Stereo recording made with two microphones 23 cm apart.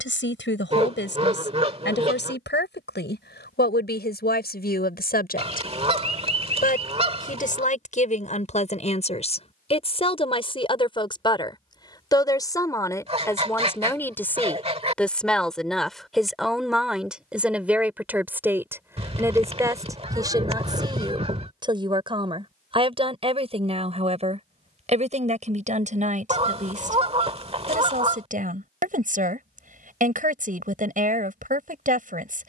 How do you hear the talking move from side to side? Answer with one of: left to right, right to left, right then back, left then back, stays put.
left to right.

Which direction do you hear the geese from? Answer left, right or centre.
right.